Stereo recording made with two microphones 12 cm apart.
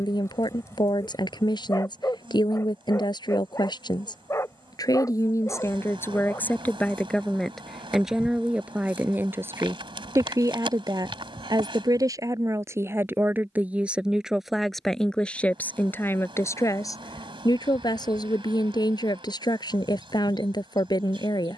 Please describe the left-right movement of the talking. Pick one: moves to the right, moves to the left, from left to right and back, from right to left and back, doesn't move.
from left to right and back.